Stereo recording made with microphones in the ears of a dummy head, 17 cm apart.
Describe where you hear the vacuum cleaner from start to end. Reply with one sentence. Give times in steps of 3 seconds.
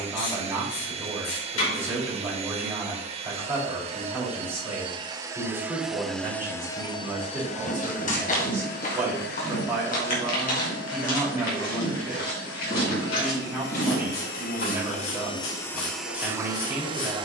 In this clip you hear the vacuum cleaner on the right from 0 s, on the left from 6 s and in the centre from 15 s.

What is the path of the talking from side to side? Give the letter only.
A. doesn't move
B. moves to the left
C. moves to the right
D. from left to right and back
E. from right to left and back
A.